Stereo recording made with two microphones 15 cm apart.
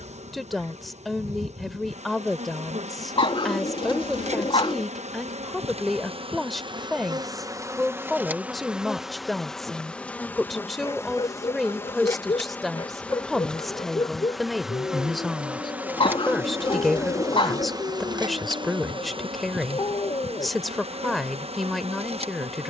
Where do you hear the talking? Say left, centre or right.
centre.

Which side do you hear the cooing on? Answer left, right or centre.
left.